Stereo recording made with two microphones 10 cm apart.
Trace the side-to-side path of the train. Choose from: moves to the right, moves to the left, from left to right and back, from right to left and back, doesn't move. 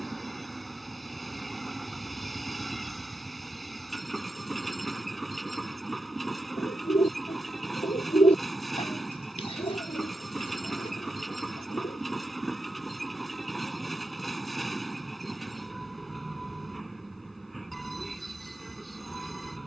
doesn't move.